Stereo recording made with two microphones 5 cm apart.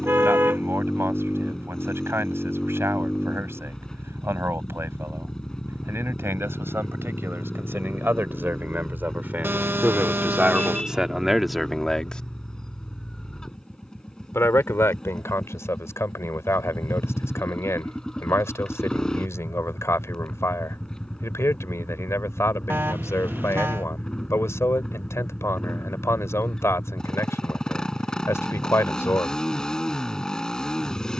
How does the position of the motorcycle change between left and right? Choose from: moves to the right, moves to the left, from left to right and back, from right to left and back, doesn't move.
doesn't move.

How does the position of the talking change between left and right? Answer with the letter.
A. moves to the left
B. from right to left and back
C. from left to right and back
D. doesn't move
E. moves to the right
A.